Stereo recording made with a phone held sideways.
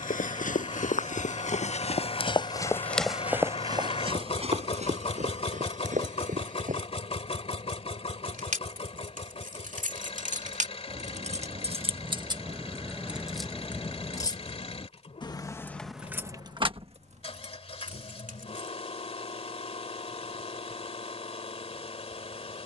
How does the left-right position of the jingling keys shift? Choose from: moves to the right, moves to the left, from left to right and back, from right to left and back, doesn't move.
from right to left and back.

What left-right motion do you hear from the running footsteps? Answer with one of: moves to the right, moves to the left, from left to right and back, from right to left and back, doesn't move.
moves to the right.